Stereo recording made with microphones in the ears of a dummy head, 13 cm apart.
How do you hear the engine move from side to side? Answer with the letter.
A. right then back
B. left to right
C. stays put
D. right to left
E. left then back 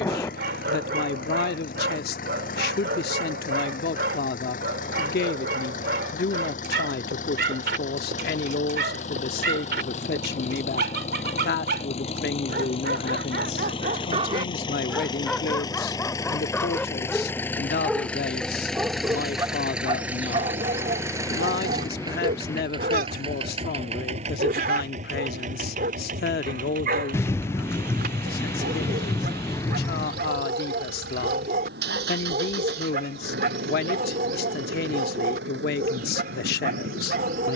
B.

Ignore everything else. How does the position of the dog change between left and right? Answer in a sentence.
You can hear the dog go left and come back.